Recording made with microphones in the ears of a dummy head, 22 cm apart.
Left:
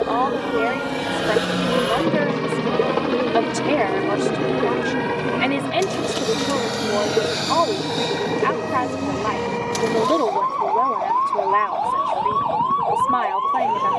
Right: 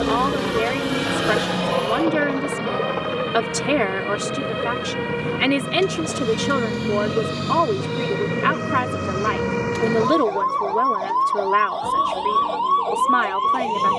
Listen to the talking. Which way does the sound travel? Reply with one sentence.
You can hear the talking stay in one place.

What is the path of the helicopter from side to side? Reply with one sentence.
You can hear the helicopter move to the left.